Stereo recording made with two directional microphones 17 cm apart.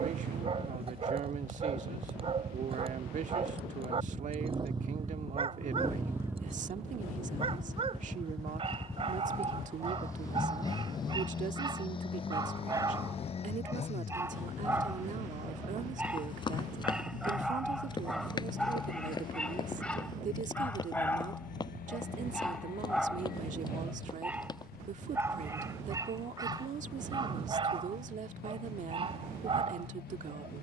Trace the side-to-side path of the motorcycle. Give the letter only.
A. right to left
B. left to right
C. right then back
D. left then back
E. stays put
A.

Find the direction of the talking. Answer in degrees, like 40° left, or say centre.
50° right.